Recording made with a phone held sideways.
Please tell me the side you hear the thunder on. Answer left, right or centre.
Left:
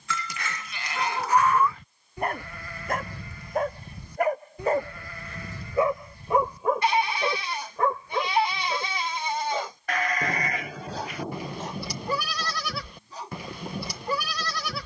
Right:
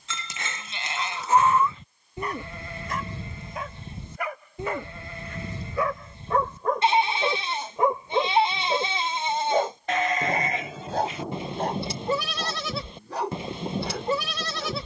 centre.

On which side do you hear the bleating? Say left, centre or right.
right.